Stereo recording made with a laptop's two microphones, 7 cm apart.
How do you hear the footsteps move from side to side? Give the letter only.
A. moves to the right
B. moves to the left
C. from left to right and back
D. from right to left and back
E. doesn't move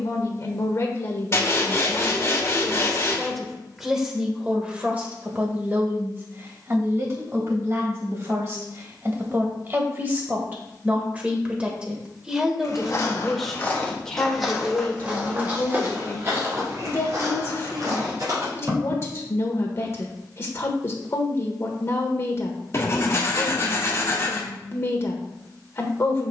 A.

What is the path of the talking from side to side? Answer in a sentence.
You can hear the talking go right and come back.